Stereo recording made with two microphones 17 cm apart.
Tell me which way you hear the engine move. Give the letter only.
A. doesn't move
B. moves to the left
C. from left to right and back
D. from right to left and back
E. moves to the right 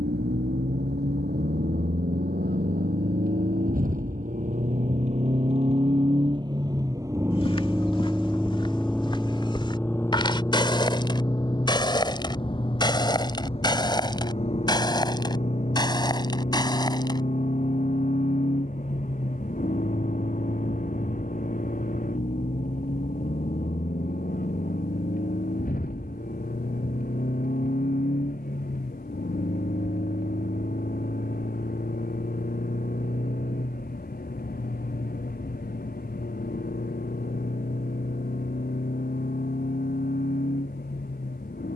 B.